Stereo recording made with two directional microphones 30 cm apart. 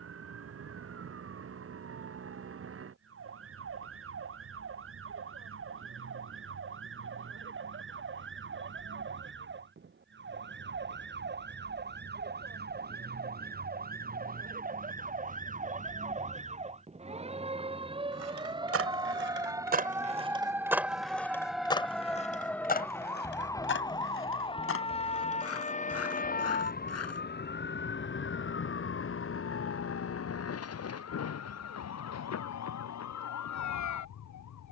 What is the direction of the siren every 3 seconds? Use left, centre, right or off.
right, right, right, right, right, right, centre, centre, left, left, left, left.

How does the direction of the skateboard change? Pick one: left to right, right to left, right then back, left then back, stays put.
right to left.